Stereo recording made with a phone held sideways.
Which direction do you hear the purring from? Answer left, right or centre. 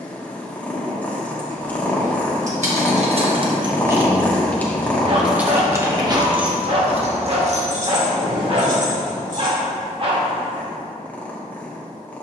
centre.